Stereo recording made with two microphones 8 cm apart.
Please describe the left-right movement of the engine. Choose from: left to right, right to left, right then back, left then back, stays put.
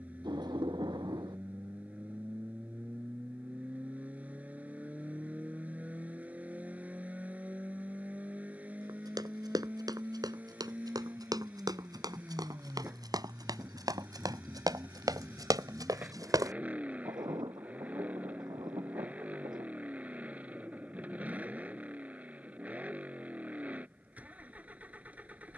stays put.